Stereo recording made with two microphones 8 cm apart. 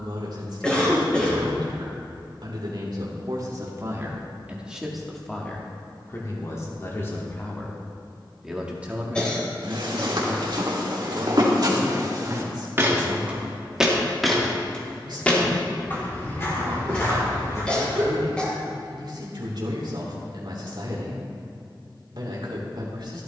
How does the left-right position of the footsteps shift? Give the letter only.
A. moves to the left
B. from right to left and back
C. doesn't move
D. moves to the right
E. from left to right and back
A.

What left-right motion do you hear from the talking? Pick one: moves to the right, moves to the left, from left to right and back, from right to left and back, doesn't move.
from right to left and back.